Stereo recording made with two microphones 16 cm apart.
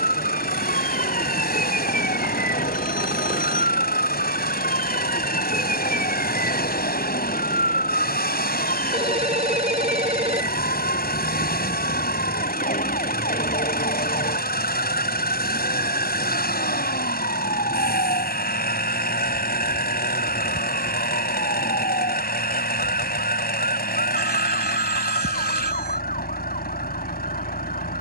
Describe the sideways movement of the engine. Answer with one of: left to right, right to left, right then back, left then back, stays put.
stays put.